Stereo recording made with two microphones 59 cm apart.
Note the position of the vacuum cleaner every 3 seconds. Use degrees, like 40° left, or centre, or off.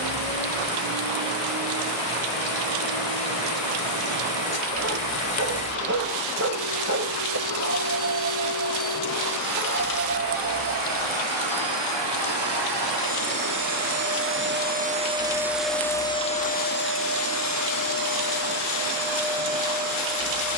70° right, 70° right, 60° right, 50° right, 30° right, 10° left, 50° left.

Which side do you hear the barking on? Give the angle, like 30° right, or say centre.
20° right.